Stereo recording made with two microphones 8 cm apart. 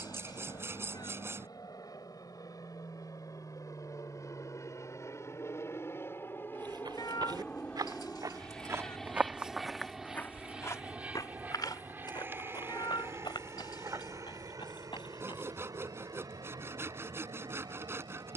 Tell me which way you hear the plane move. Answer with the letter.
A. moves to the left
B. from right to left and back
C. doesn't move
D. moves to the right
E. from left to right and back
D.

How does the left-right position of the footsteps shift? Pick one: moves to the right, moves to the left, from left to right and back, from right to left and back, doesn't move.
moves to the left.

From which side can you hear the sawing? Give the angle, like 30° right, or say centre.
30° right.